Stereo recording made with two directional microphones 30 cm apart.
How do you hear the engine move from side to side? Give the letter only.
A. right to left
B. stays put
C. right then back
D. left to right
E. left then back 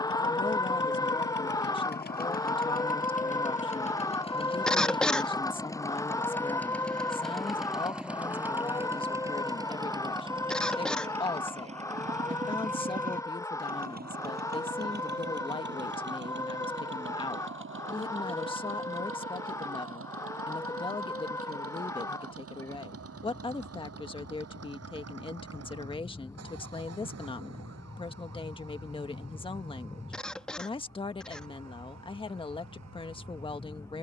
D.